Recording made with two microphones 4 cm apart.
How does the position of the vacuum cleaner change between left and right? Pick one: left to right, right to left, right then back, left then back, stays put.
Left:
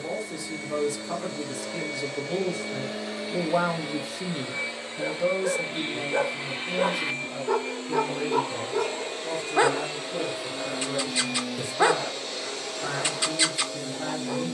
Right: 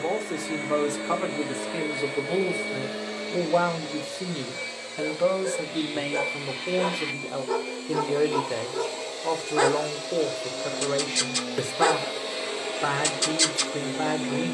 left then back.